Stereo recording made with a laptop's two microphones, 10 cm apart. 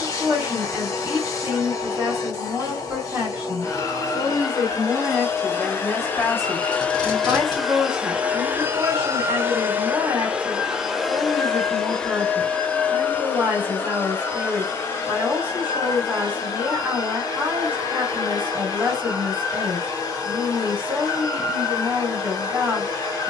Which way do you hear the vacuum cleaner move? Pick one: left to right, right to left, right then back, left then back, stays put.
right then back.